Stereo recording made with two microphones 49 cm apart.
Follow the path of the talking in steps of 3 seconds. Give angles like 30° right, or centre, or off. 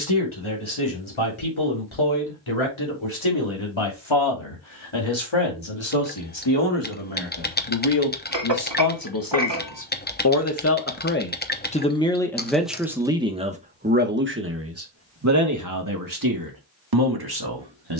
80° left, 70° left, 60° left, 30° left, 10° right, 40° right.